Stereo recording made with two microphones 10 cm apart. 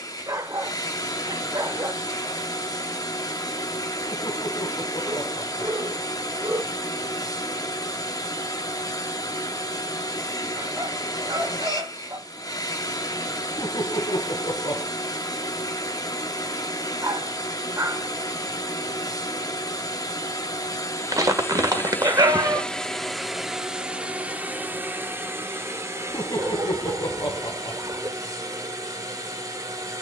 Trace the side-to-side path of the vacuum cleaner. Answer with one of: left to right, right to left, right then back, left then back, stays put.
left to right.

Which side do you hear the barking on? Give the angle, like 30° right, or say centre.
40° right.